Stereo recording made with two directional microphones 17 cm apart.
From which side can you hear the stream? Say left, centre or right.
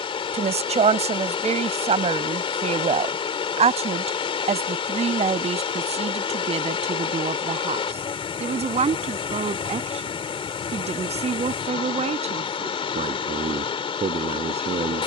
left.